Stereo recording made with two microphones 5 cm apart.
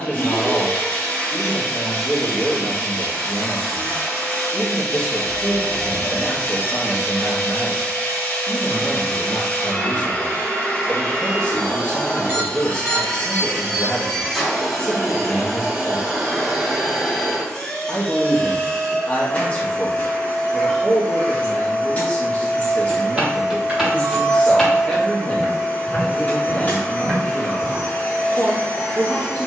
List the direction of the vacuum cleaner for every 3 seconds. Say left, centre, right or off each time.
left, left, left, left, centre, centre, left, left, left, left.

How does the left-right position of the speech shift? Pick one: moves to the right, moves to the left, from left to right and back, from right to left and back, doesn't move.
doesn't move.